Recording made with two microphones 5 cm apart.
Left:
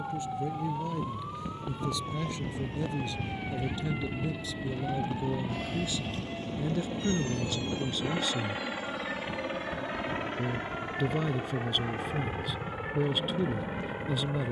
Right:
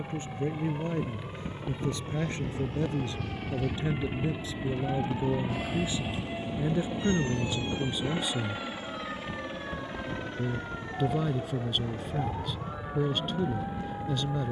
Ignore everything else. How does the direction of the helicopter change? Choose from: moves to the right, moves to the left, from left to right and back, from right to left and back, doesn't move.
moves to the left.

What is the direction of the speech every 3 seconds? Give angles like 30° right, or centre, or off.
40° right, 40° right, 20° right, centre, centre.